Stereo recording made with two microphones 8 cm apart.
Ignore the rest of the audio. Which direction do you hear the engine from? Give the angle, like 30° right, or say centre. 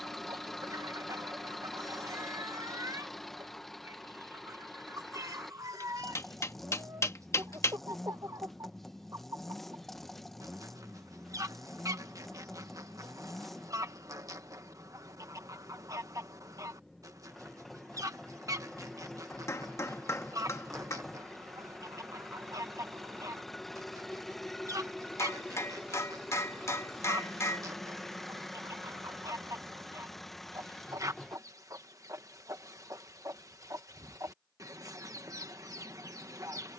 centre.